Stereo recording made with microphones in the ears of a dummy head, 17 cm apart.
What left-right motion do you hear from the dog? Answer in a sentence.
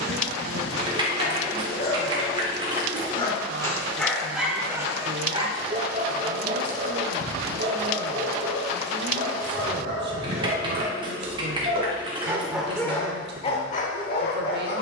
You can hear the dog move from left to right and back again.